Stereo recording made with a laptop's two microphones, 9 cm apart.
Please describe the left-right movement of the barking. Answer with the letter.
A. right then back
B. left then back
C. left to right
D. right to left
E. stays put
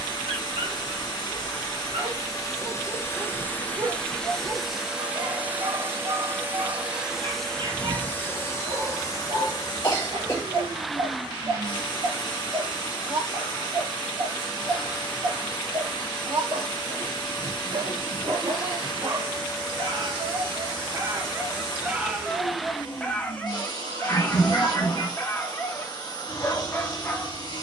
D.